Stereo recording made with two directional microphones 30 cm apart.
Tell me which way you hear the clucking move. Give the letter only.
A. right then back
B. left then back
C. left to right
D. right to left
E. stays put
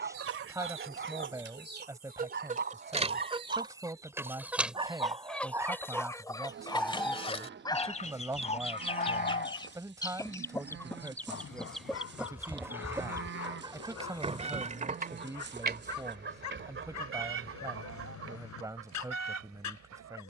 B.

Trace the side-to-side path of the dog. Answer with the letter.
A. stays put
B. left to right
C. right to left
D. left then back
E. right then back
C.